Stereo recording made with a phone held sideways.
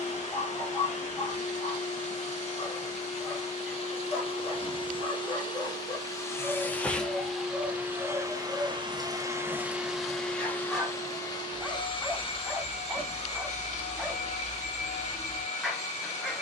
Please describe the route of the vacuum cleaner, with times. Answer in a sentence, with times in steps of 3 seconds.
You can hear the vacuum cleaner on the left from 0 s, in the centre from 6 s and on the left from 12 s.